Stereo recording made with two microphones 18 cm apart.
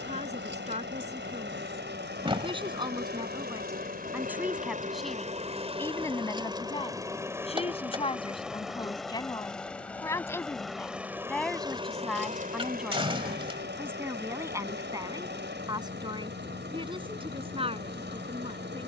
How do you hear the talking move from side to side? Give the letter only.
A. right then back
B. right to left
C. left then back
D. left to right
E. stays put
C.